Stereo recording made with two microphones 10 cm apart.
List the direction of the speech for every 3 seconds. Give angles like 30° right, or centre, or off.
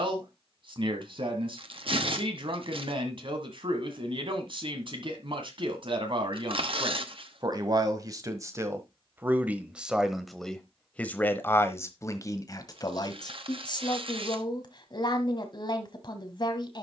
60° right, 60° right, 40° right, centre, 40° left, 50° left.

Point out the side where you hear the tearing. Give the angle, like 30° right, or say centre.
60° right.